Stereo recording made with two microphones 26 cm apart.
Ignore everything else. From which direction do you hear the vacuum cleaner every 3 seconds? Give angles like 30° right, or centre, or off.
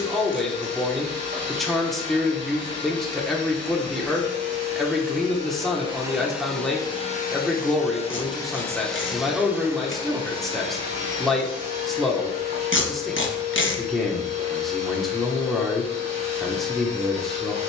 40° right, 30° right, 10° left, 20° right, 40° right, 40° right.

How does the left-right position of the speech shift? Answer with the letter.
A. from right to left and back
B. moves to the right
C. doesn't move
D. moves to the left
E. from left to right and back
C.